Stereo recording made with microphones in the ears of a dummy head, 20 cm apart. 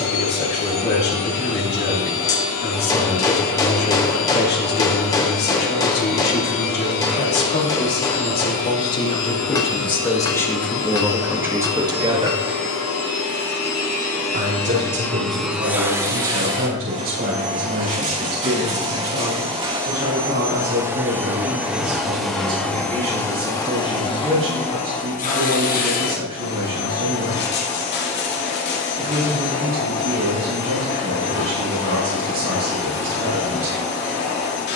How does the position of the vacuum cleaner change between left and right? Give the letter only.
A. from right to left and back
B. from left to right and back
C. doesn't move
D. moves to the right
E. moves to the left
B.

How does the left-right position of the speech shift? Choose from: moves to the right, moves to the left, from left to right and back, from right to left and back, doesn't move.
moves to the right.